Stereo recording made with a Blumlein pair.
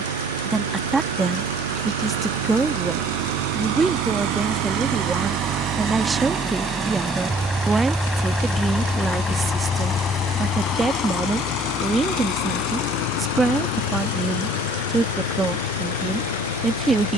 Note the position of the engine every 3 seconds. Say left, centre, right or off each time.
right, right, centre, left, left, left.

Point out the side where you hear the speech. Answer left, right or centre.
centre.